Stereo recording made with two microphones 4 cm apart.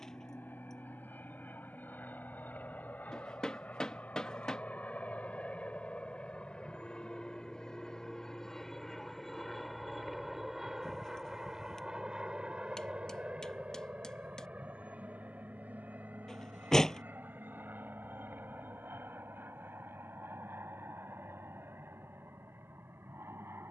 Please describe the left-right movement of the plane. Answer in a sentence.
In this clip you hear the plane move from left to right.